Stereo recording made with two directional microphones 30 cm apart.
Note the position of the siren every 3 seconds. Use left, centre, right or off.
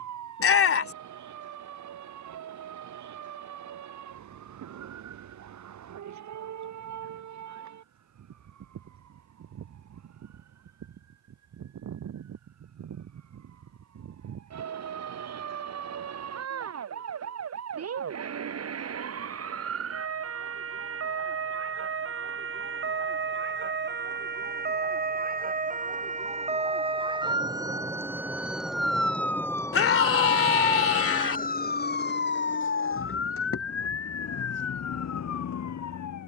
right, right, right, right, right, right, right, right, right, centre, left, left.